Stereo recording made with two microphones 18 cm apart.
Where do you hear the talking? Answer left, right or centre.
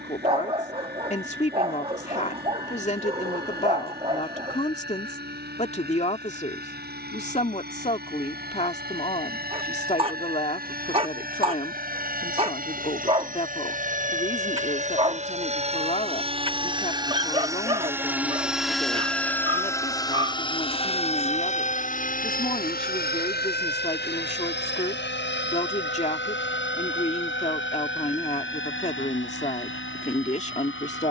left.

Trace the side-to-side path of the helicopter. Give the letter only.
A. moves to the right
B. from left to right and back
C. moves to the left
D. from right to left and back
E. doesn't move
C.